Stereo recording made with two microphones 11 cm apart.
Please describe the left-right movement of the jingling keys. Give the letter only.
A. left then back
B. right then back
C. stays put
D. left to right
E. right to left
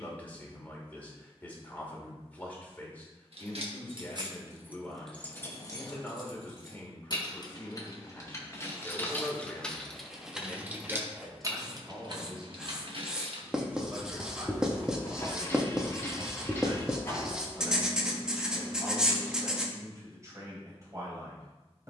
A.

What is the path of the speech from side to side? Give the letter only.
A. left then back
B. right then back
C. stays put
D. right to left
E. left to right
E.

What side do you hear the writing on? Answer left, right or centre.
centre.